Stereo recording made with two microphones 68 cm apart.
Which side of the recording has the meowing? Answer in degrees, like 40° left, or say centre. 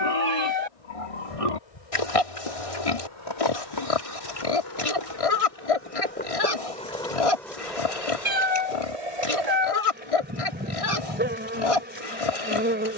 60° right.